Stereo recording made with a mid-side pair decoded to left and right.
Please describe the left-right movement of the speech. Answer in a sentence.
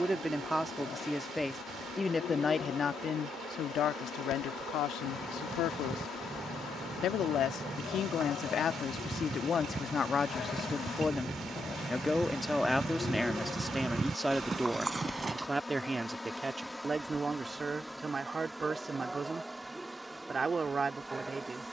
You can hear the speech go left and come back.